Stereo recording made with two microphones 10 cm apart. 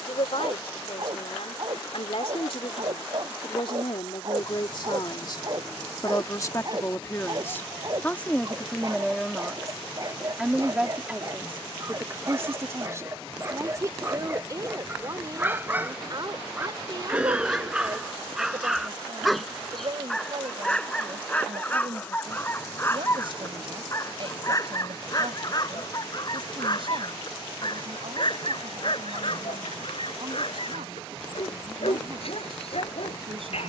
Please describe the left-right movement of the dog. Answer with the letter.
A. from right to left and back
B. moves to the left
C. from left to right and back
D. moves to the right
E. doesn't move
B.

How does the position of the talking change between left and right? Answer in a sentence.
In this clip you hear the talking travel towards the right.